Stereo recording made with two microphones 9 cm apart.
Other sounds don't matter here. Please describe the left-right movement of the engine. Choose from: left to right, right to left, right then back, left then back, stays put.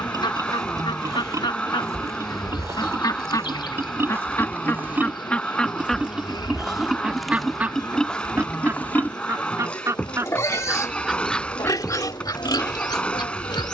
stays put.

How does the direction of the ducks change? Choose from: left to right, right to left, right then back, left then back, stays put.
right then back.